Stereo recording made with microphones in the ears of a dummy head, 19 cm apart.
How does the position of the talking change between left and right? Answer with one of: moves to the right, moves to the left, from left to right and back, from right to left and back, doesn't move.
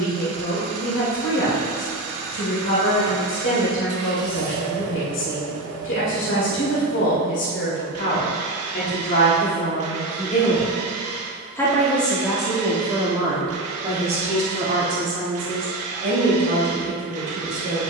moves to the right.